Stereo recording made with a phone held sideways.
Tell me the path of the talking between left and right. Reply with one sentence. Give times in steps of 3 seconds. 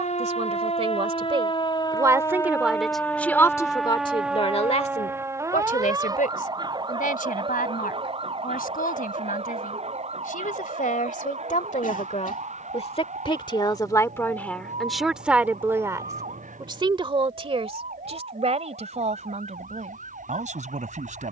You can hear the talking on the right from 0 s, on the left from 3 s and on the right from 15 s.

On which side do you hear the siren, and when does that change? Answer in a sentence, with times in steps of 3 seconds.
You can hear the siren on the left from 0 s, in the centre from 3 s and on the right from 6 s.